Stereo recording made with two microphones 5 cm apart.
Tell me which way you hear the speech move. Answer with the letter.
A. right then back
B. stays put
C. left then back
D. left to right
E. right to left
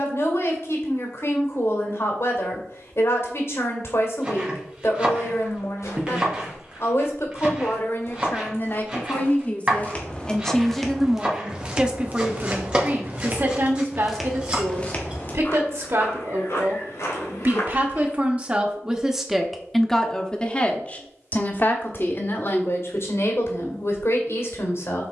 A.